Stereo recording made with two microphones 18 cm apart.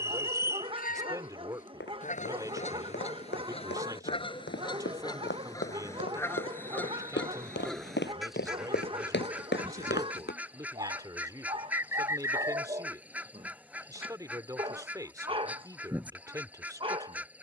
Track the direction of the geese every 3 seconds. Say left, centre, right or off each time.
left, left, centre, centre, centre, centre.